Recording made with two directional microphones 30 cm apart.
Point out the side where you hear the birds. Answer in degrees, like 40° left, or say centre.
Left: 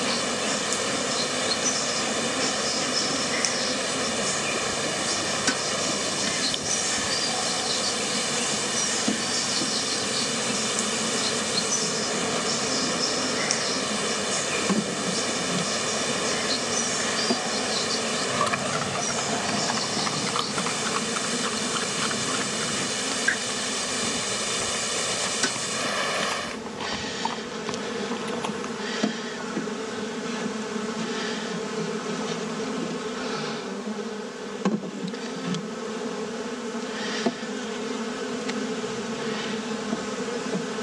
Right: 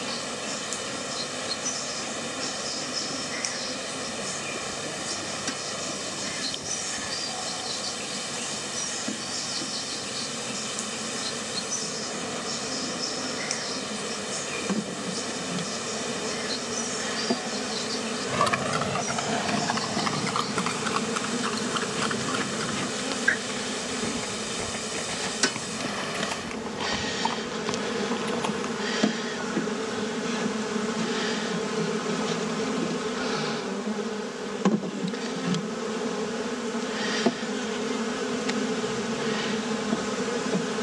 30° left.